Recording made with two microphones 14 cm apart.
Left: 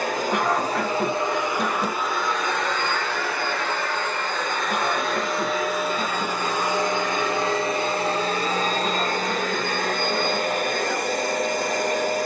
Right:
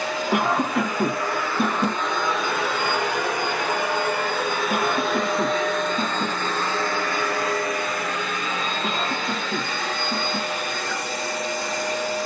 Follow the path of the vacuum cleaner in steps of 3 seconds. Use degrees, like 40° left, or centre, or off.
20° left, 10° right, 20° left, 50° left.